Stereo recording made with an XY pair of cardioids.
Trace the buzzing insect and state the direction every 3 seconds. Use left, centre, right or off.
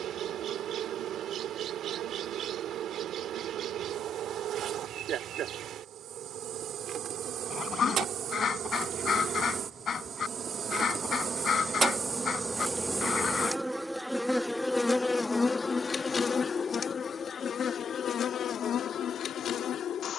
right, right, right, right, centre, left, left.